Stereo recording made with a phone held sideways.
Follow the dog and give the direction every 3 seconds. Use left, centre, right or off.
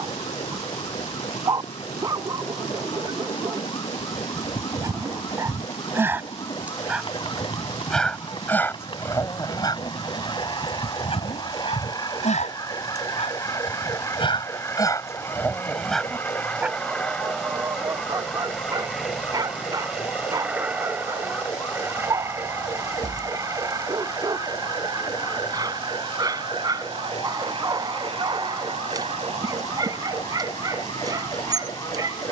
right, right, centre, left, left, centre, right, right, right, right, right.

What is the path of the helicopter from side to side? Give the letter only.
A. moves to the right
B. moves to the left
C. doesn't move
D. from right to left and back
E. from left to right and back
A.